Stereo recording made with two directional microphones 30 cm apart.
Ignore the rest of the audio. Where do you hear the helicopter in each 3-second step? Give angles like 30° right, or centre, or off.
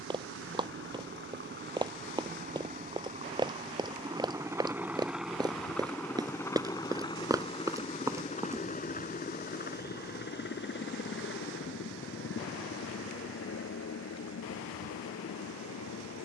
40° right, 10° right, 20° left, 30° left, 40° left, 50° left.